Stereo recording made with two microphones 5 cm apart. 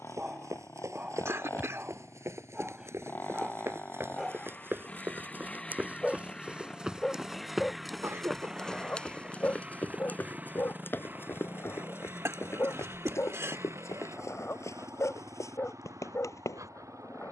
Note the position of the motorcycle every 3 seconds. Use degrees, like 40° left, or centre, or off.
40° left, 20° left, centre, 30° right, 50° right, 60° right.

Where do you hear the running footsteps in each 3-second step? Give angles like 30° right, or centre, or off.
60° right, 40° right, centre, 30° left, 50° left, 60° left.